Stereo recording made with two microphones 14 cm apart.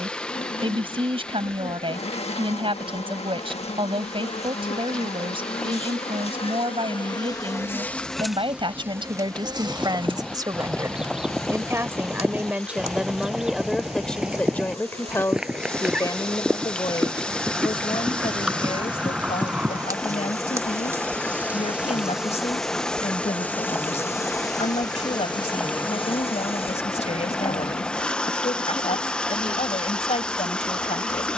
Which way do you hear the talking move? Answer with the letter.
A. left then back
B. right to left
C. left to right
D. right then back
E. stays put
B.